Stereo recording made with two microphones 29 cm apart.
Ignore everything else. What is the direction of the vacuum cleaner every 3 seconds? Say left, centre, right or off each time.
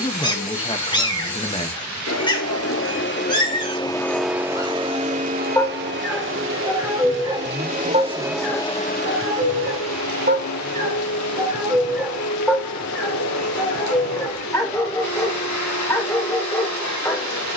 left, centre, right, left, left, left.